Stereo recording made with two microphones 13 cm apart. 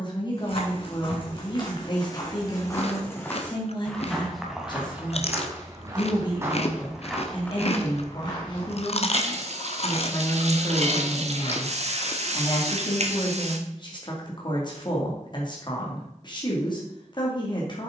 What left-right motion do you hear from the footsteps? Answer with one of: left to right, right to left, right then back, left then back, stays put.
right then back.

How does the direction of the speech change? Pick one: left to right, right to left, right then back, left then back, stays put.
stays put.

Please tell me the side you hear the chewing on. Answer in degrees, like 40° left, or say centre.
50° left.